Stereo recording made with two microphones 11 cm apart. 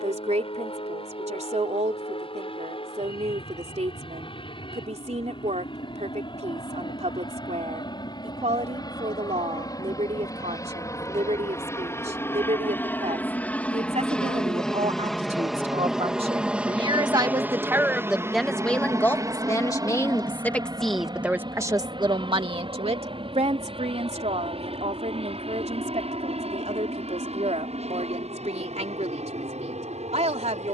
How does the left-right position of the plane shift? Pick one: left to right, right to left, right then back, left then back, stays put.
left to right.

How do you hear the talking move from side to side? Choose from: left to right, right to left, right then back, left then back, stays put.
left then back.